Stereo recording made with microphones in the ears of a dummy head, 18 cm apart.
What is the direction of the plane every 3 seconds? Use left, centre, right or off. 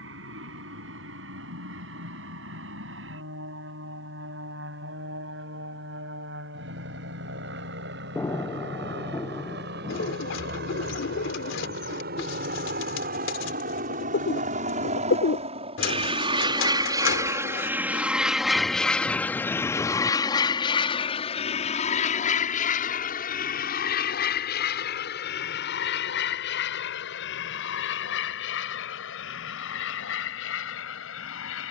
right, right, right, right, right, right, centre, left, left, left, left.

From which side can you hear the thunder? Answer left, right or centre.
centre.